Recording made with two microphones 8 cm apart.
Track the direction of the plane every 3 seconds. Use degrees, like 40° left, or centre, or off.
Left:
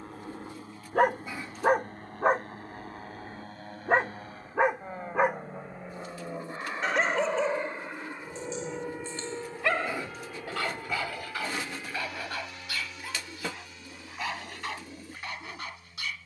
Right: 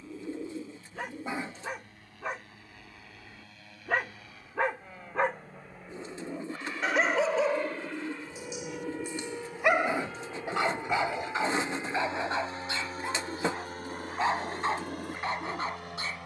50° left, 40° left, 30° left, 10° right, 40° right, 60° right.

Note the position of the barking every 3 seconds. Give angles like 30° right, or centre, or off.
60° left, 20° left, centre, 20° right, 30° right, 30° right.